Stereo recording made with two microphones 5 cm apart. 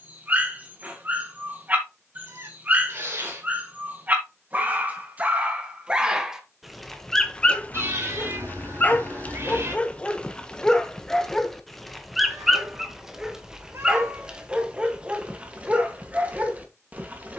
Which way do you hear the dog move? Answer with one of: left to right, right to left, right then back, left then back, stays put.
left then back.